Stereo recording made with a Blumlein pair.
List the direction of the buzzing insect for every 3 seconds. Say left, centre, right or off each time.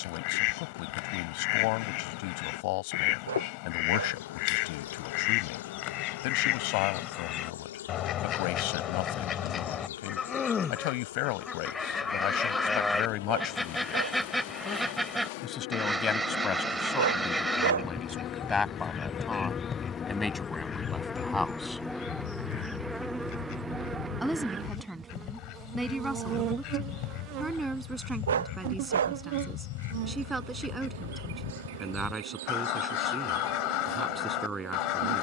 left, left, left, left, left, left, left, centre, right, right, right, right.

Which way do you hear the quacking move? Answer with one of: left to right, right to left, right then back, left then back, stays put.
right then back.